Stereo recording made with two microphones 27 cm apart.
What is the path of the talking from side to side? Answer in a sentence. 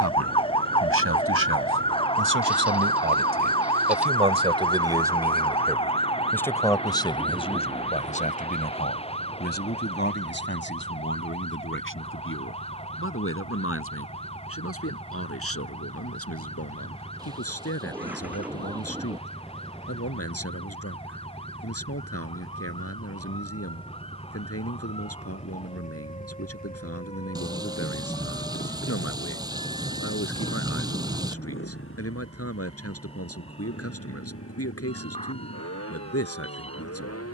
In this clip you hear the talking travel towards the left.